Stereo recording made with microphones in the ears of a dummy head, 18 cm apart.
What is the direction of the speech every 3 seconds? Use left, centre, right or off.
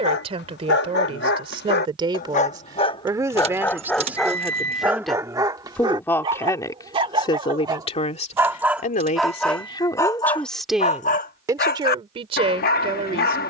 right, centre, left, centre, right.